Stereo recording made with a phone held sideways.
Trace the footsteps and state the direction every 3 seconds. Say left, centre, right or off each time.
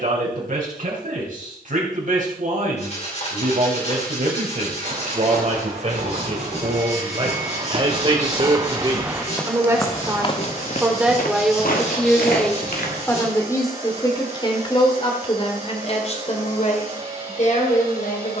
off, right, right, left, left, off.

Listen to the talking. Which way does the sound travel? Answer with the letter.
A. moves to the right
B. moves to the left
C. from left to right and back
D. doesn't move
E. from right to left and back
B.